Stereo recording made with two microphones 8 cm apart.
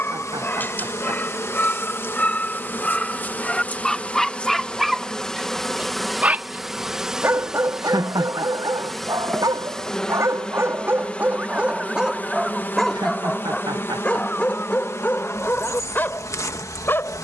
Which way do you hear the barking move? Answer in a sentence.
You can hear the barking move from left to right and back again.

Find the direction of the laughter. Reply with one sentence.
In this clip you hear the laughter on the right.